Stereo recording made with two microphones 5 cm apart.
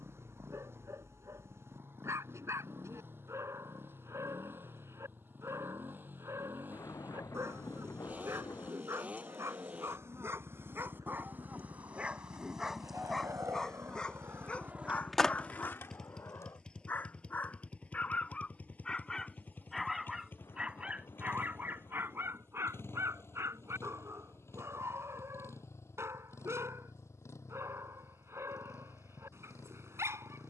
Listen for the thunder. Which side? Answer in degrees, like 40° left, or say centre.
70° left.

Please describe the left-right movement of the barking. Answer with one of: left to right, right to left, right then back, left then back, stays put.
left then back.